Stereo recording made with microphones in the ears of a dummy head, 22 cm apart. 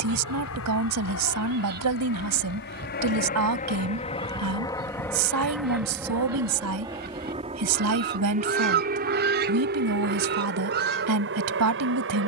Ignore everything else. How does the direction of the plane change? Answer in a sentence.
In this clip you hear the plane move to the right.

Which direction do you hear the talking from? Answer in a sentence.
You can hear the talking on the right.